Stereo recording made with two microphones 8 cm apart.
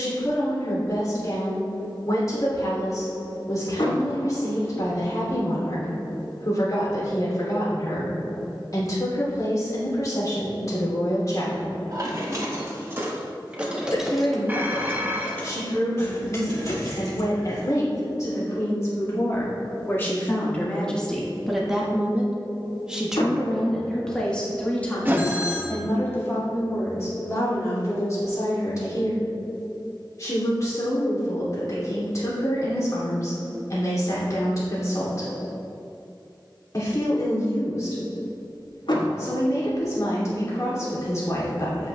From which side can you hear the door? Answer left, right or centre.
left.